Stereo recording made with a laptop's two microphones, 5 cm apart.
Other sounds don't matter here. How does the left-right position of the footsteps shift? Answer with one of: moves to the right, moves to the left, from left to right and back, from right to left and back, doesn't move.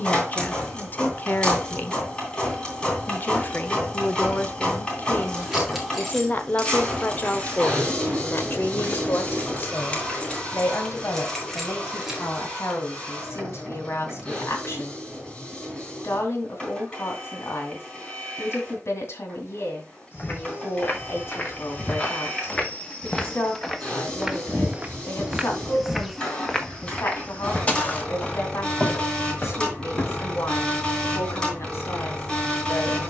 from left to right and back.